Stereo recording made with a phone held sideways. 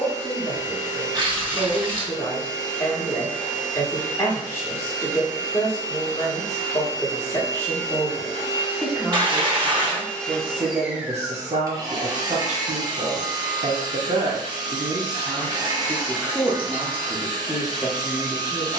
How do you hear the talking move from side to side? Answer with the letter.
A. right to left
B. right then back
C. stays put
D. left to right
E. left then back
B.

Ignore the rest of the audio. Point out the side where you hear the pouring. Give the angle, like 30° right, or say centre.
30° right.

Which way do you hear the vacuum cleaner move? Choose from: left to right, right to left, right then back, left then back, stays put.
left to right.